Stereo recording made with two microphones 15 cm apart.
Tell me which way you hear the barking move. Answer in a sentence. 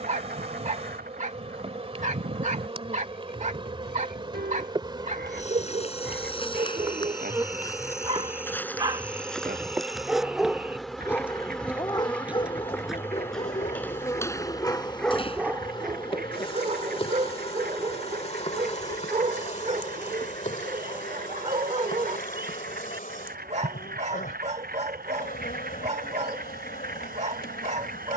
In this clip you hear the barking go left and come back.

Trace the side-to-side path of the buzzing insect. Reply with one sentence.
You can hear the buzzing insect travel towards the left.